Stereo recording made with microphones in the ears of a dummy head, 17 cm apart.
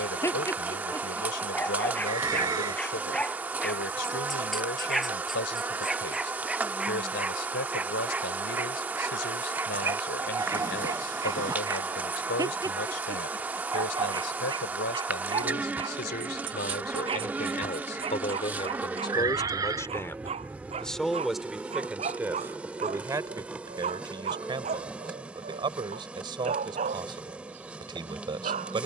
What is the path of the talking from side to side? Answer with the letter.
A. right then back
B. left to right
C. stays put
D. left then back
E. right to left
B.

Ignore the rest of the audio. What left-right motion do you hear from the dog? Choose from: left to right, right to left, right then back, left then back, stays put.
left to right.